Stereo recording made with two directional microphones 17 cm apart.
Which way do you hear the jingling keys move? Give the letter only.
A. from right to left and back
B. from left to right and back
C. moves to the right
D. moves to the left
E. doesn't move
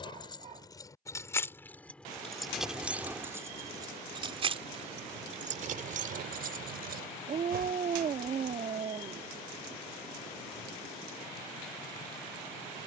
C.